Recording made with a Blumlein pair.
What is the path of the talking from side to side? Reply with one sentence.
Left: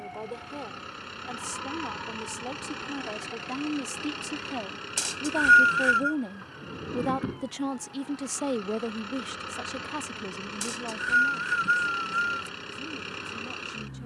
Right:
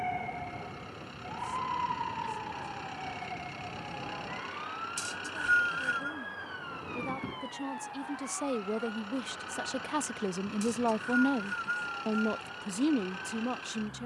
You can hear the talking move from left to right.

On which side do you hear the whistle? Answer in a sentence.
In this clip you hear the whistle on the left.